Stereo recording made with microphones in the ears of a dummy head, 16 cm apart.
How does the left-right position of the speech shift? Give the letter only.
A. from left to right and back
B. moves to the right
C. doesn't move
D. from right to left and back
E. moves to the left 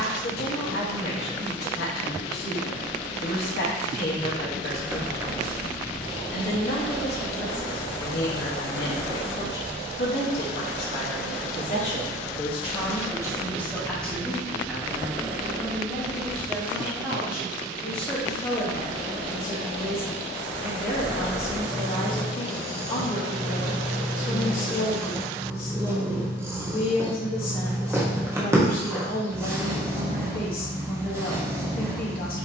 A.